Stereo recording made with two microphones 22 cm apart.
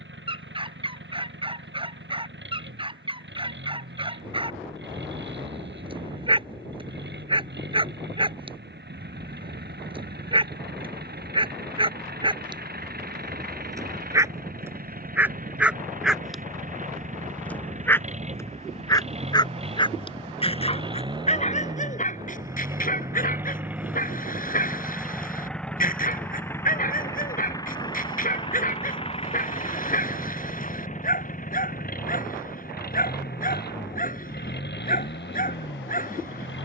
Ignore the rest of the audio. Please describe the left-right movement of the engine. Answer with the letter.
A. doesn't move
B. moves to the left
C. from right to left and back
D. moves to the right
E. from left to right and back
B.